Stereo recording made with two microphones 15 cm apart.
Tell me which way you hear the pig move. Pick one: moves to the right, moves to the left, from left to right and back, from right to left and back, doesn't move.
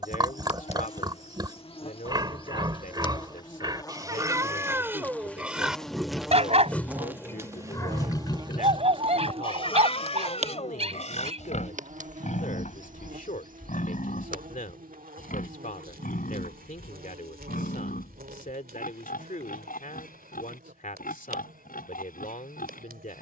moves to the left.